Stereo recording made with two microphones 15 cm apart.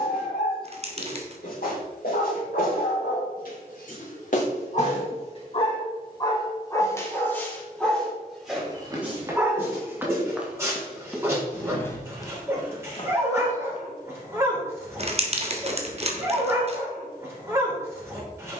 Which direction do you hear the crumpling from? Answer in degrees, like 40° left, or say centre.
40° right.